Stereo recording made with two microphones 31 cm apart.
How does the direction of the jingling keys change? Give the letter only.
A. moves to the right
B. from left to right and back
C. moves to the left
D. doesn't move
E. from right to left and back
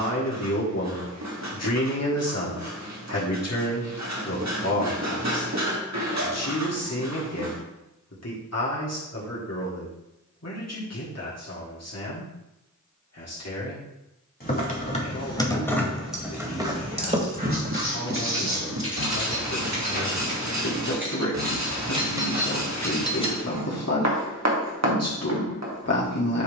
B.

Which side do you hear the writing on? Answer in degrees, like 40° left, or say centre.
60° right.